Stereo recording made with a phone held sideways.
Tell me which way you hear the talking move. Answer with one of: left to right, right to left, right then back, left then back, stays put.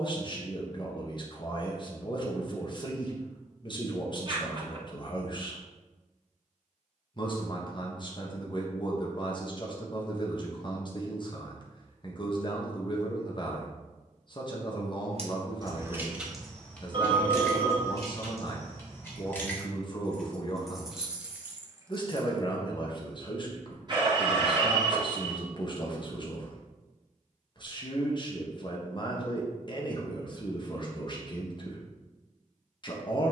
stays put.